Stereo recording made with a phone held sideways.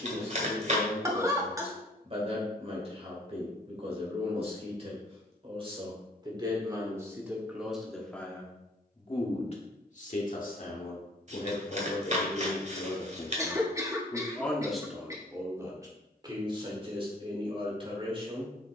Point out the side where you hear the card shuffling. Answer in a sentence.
In this clip you hear the card shuffling on the right.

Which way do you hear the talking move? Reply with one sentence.
In this clip you hear the talking move from right to left and back again.